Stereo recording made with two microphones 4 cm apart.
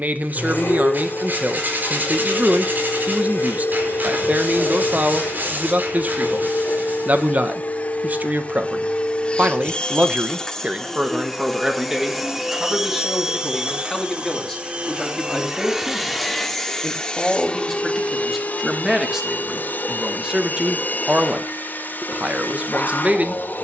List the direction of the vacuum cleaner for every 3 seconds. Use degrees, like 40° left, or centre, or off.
60° left, 60° left, 40° left, 10° left, 20° right, 10° left, 50° left, 50° left.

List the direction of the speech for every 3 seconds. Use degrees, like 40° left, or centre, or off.
40° right, 40° right, 40° right, 30° right, centre, centre, 10° right, 30° right.